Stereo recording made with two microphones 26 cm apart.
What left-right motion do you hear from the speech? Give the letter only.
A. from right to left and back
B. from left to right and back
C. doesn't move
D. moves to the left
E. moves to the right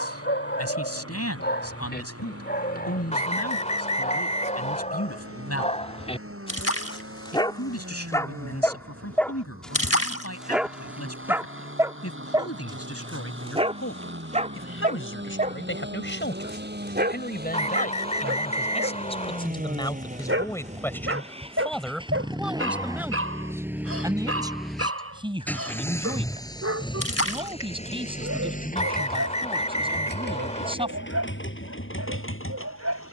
E.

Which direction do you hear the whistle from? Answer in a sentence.
You can hear the whistle on the left.